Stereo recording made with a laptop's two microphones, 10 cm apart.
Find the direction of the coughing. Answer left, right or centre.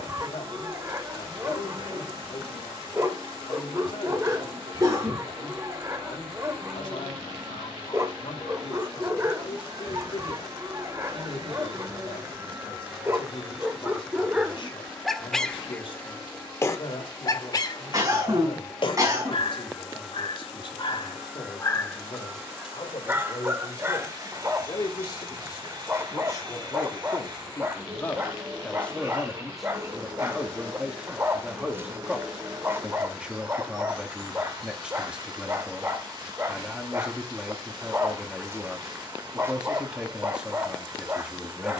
right.